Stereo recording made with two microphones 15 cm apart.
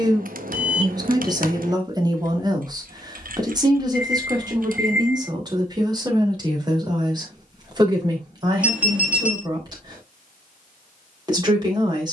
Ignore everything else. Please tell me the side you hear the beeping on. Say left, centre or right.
centre.